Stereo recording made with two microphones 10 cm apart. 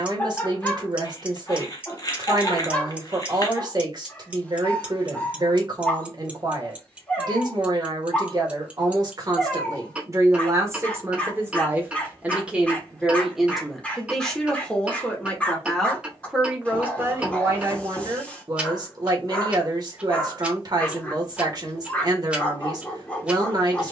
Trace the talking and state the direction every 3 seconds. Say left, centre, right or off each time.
right, right, right, right, centre, centre, right, right.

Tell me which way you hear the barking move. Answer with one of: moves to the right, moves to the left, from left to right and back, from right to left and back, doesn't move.
doesn't move.